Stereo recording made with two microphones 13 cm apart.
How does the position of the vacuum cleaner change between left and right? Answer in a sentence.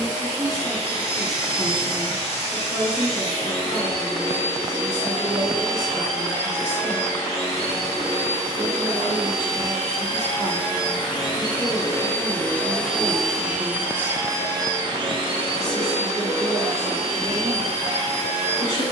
In this clip you hear the vacuum cleaner move to the right.